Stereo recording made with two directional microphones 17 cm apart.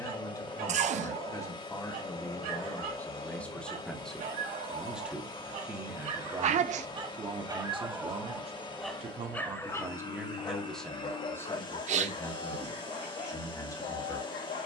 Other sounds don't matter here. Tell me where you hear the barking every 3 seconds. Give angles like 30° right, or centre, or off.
60° right, 50° right, 20° right, 30° left, 50° left.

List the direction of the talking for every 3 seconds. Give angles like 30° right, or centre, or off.
20° left, centre, 30° right, centre, 20° left.